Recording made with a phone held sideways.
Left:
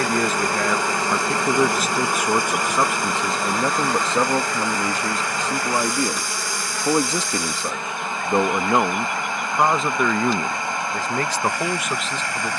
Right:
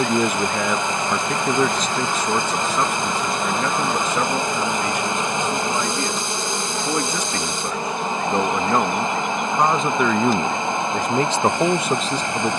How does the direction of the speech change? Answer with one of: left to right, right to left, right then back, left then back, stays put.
left then back.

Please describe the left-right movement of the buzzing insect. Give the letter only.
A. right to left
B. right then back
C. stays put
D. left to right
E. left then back
D.